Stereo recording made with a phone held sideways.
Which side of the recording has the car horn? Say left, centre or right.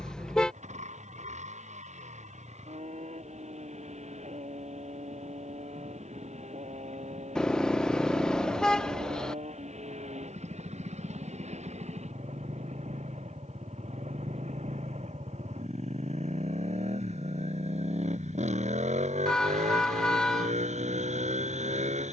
centre.